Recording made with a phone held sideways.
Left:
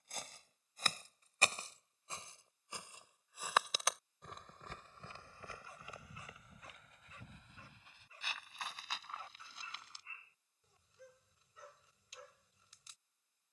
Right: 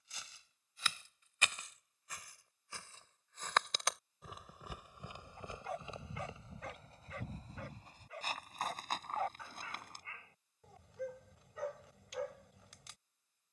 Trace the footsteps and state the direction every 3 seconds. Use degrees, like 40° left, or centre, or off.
30° left, 10° right, 40° right, 50° right, off.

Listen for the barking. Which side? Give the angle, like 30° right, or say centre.
80° right.